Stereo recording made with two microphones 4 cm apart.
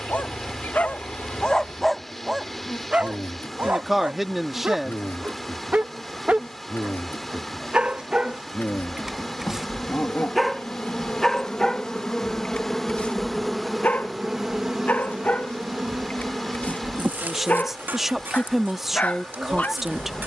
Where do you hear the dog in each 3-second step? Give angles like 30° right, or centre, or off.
20° left, 40° right, 20° right, centre, 40° left, 40° left, 40° left.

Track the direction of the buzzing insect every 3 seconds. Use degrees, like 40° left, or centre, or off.
60° left, 60° left, 60° left, 40° left, centre, 40° right, 50° right.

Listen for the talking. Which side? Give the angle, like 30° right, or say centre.
10° right.